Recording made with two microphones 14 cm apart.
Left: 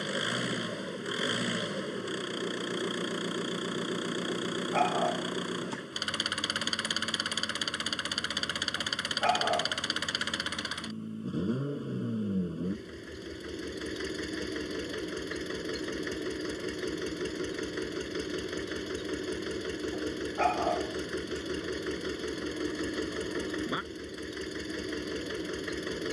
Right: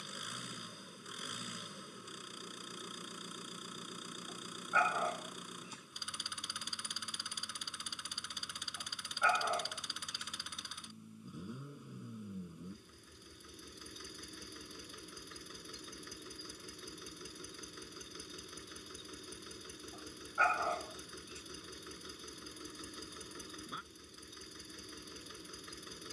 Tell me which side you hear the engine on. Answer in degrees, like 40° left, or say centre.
70° left.